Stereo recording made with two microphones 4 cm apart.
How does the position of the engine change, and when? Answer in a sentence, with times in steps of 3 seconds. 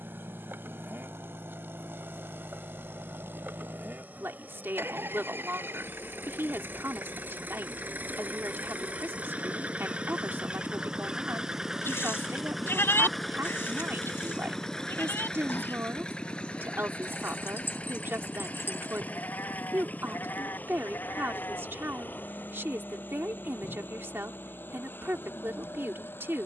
In this clip you hear the engine on the right from 0 s, in the centre from 12 s and on the left from 15 s.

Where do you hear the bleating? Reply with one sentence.
In this clip you hear the bleating on the left.